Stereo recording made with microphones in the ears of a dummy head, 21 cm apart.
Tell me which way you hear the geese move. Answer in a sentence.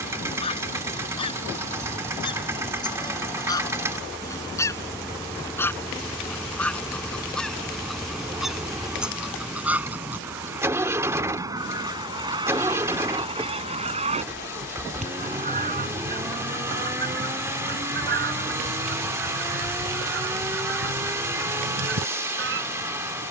You can hear the geese travel towards the right.